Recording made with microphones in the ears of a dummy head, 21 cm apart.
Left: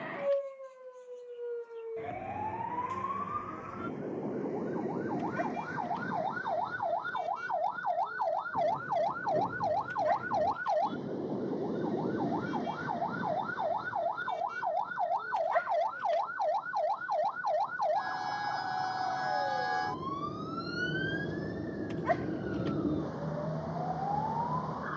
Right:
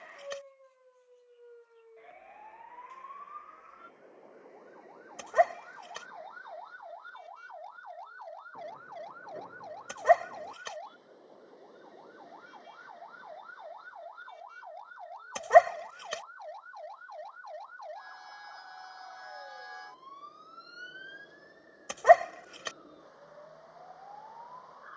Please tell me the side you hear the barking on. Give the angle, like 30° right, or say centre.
80° right.